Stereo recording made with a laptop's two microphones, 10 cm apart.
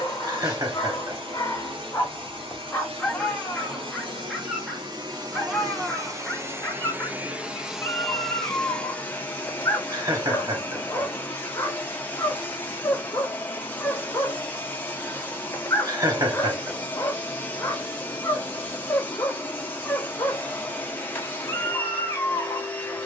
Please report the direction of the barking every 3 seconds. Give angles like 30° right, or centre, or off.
30° left, centre, 20° left, 30° left, 30° left, 30° left, 30° left, 30° left.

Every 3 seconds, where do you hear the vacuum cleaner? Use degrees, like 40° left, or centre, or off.
60° right, 50° right, 10° right, 20° left, 20° left, 20° left, 20° left, 20° left.